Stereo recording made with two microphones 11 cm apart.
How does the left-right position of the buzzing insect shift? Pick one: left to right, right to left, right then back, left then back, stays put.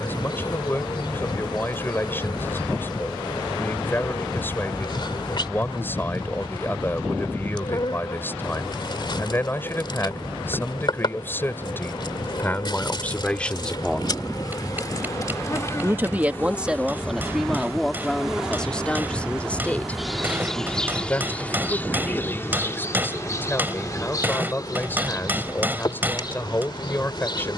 right then back.